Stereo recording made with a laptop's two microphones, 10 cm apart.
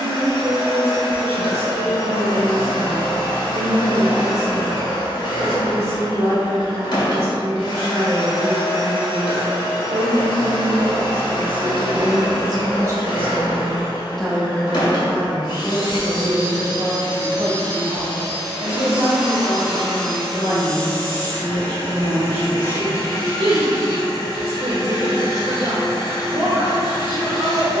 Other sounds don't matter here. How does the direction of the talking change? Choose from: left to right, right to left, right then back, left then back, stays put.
left then back.